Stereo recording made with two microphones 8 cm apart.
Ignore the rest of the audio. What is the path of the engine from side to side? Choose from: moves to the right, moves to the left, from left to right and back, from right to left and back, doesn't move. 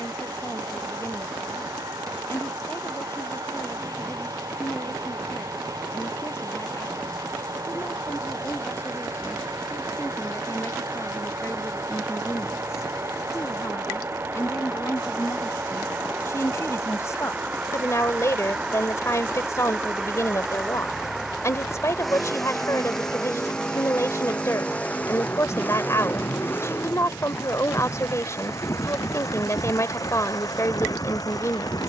moves to the left.